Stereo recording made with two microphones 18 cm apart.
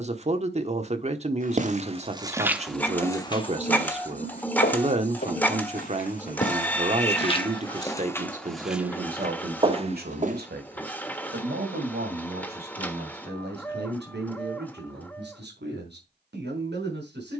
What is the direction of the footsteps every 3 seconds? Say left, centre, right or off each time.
right, left, left, right, off, off.